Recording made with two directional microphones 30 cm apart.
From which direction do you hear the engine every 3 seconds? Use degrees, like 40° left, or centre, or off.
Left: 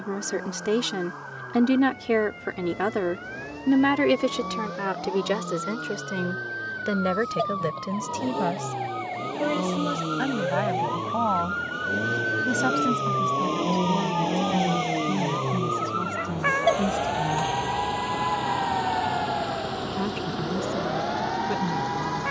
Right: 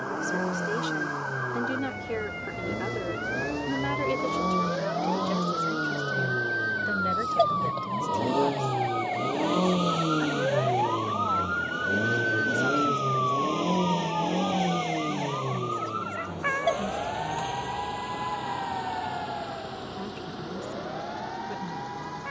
60° right, 50° right, 40° right, 20° right, centre, 30° left, 50° left, 50° left.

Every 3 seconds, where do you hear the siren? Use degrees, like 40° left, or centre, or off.
50° right, 40° right, 30° right, 10° right, 10° left, 30° left, 40° left, 50° left.